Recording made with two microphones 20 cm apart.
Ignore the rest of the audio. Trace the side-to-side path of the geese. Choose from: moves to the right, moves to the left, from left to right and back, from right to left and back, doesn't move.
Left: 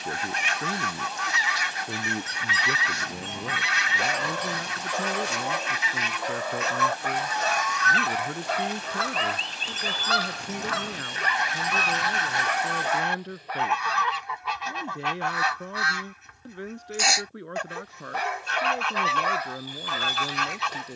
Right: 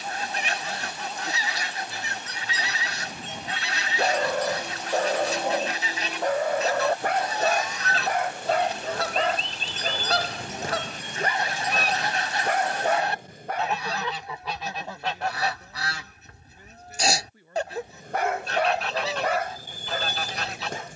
doesn't move.